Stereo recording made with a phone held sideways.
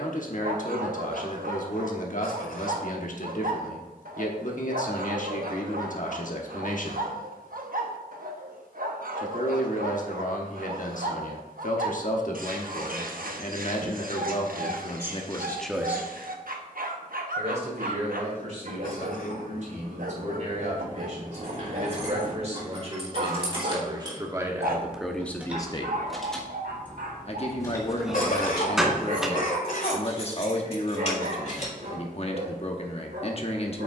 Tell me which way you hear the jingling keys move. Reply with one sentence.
In this clip you hear the jingling keys travel towards the left.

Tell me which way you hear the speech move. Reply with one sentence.
You can hear the speech move from left to right and back again.